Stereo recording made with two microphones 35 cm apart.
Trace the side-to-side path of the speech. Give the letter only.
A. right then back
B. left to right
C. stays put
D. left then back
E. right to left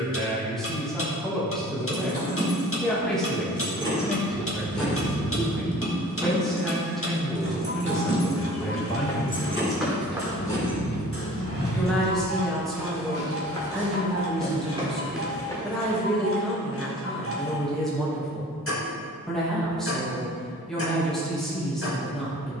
C.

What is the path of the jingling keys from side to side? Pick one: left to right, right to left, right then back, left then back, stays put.
right then back.